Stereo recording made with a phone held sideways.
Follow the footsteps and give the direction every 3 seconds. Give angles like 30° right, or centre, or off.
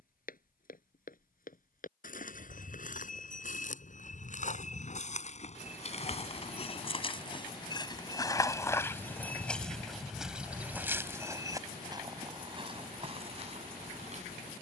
60° left, 50° left, 30° left, 10° right, 40° right.